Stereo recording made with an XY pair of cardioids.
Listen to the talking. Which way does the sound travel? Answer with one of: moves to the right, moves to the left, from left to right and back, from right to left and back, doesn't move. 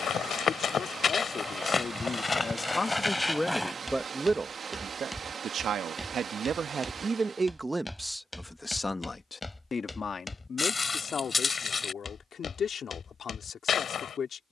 from left to right and back.